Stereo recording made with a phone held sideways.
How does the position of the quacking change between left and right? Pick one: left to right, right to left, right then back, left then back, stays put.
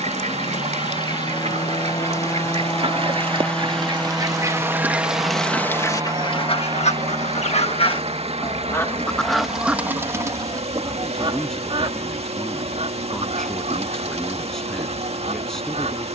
left then back.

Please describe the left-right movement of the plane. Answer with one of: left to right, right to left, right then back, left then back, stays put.
left to right.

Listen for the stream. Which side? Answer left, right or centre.
right.